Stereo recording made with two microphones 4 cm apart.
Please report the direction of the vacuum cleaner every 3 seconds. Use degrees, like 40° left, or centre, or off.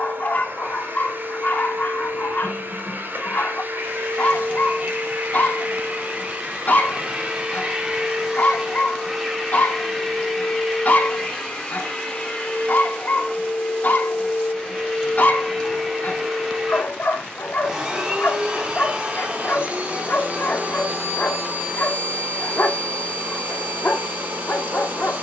50° right, 40° right, 20° right, 10° left, 20° left, centre, 30° right, 40° right, 40° right.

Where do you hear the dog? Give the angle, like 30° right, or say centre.
50° left.